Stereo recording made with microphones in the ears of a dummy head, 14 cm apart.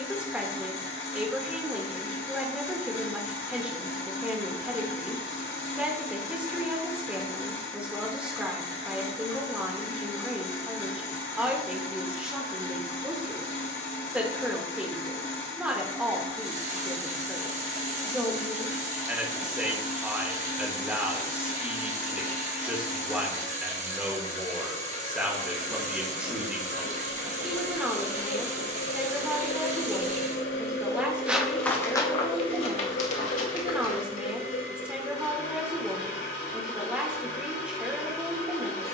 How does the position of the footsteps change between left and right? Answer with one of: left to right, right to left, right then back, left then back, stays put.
right to left.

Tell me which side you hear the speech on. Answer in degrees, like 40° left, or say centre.
10° right.